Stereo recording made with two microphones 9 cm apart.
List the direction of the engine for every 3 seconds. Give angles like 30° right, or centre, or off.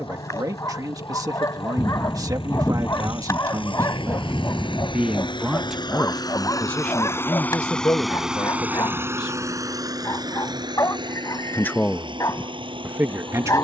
80° left, 70° left, 20° left, 50° right, 60° right.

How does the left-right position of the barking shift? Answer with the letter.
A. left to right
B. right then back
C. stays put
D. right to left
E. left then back
C.